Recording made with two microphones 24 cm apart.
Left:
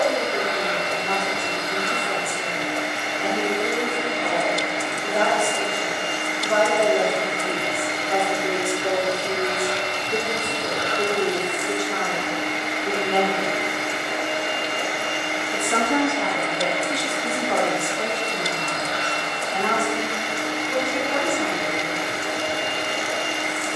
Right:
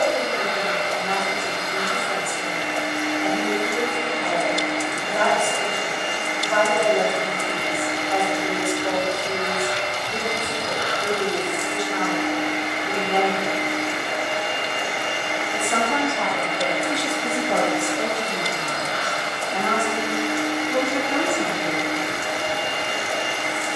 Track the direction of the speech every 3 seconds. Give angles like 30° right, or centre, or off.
60° left, 60° left, 60° left, 60° left, 50° left, 10° left, 40° right, 50° right.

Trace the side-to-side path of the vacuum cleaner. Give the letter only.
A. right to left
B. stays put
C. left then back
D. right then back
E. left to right
B.